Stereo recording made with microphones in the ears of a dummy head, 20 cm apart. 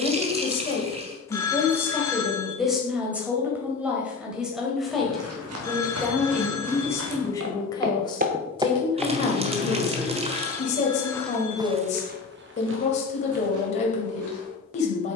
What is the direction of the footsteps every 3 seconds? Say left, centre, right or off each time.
off, right, right, centre, right.